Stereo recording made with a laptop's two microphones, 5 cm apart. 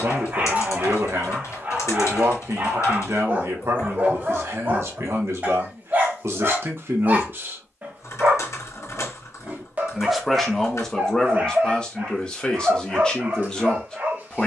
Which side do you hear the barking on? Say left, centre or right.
right.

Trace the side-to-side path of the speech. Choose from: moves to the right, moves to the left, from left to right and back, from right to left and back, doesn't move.
moves to the left.